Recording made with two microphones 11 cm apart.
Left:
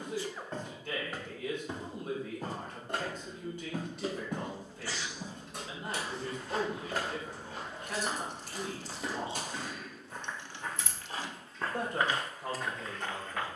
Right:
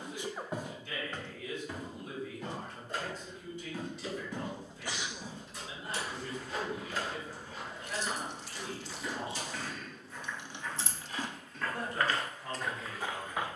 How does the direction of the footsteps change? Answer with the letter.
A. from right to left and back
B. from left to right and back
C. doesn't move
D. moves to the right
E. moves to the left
A.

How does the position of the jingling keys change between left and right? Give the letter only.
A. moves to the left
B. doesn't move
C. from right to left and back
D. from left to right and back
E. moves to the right
E.